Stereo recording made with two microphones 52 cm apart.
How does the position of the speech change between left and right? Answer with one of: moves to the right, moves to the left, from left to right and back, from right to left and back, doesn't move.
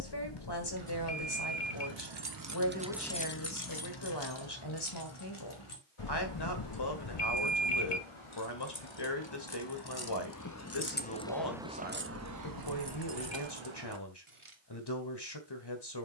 doesn't move.